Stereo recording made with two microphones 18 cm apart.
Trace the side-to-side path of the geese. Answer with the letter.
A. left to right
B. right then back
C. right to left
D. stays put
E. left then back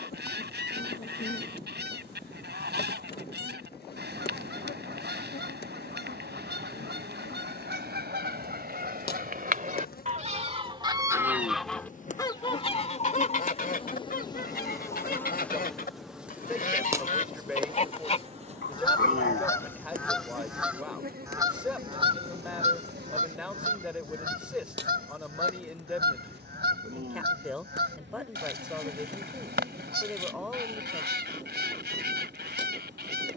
E.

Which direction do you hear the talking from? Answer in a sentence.
You can hear the talking in the centre.